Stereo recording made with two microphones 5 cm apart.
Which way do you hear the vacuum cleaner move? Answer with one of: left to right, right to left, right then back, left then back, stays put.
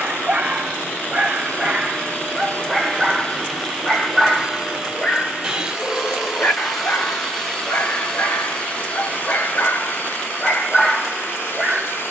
right then back.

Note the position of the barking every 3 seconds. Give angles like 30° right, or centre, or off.
20° right, 10° left, 40° left, 20° left.